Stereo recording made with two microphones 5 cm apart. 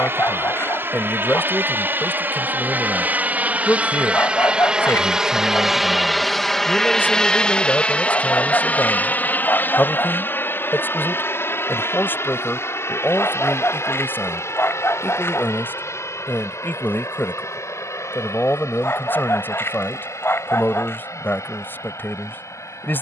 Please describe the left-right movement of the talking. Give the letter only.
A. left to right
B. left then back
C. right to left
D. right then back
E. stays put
E.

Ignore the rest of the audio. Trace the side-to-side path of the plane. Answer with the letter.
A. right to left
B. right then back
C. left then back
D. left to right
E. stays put
A.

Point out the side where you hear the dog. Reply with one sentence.
In this clip you hear the dog on the left.